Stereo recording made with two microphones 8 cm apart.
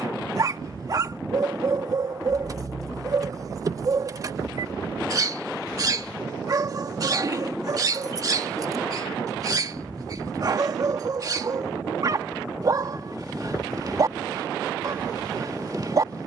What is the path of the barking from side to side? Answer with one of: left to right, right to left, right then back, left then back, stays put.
stays put.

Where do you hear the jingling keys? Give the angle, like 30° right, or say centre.
40° right.